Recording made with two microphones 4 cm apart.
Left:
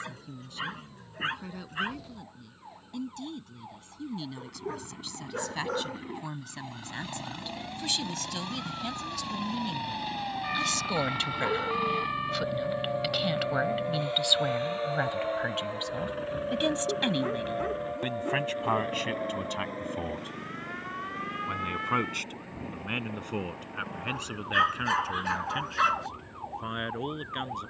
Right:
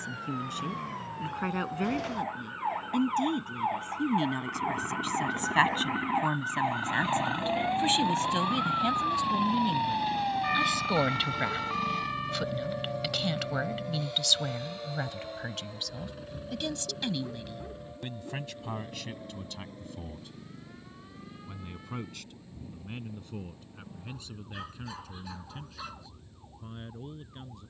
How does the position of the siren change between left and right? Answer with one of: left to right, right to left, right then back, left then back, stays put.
right to left.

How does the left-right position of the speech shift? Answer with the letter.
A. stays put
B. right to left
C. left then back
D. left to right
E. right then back
B.